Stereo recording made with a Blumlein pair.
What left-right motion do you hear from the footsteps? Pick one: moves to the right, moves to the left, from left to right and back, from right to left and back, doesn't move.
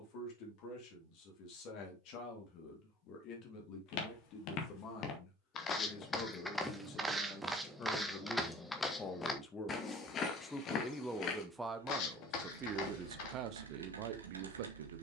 from left to right and back.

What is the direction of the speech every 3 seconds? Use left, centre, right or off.
left, left, left, centre, right.